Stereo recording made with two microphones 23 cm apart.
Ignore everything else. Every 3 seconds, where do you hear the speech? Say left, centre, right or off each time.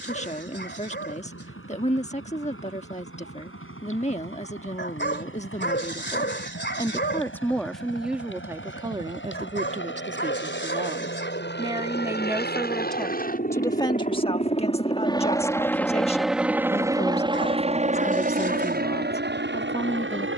left, left, centre, right, centre, left, left.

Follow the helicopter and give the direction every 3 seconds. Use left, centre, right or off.
left, left, left, left, left, centre, right.